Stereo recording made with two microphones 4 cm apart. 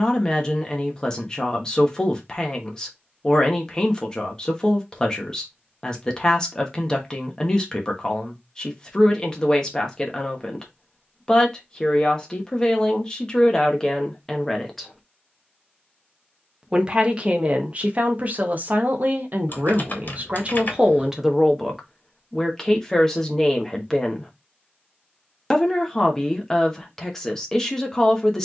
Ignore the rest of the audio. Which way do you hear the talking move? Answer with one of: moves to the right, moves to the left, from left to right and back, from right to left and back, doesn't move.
from left to right and back.